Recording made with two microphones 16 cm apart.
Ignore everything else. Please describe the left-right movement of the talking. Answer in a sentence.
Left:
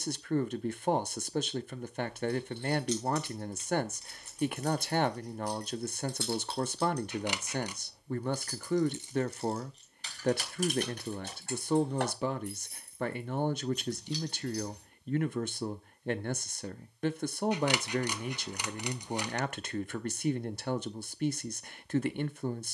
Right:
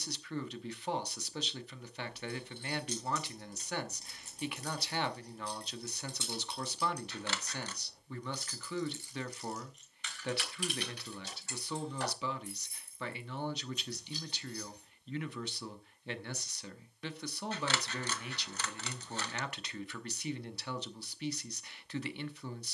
You can hear the talking stay put.